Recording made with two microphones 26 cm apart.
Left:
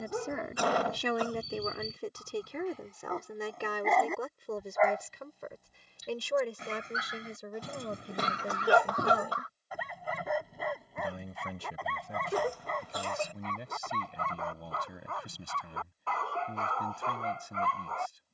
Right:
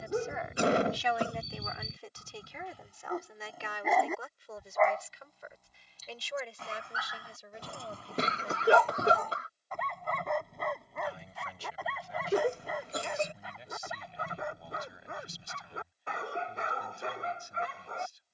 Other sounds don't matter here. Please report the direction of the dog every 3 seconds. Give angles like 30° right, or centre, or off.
20° right, centre, 20° left, centre, 10° right, 20° right.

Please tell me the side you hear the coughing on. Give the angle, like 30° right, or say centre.
30° right.